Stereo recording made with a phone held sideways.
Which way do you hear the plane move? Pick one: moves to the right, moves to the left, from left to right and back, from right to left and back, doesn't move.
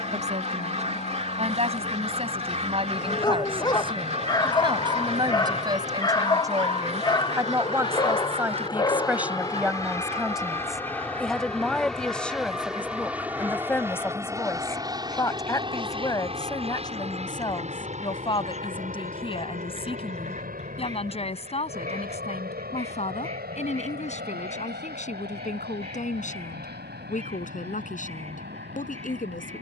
moves to the right.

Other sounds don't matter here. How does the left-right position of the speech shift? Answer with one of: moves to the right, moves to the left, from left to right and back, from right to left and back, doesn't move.
moves to the left.